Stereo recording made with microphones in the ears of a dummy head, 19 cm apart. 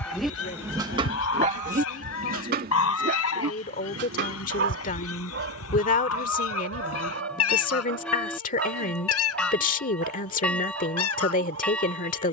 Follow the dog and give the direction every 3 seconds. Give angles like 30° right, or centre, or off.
30° right, 50° right, 60° right, 60° right.